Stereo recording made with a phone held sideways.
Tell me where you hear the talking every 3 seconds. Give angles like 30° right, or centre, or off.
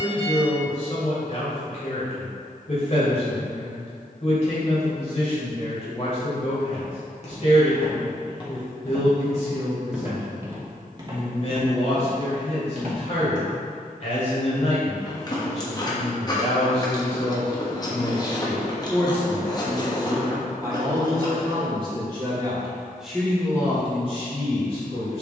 50° left, 50° left, 50° left, 50° left, 50° left, 50° left, 10° left, 10° right, 40° left.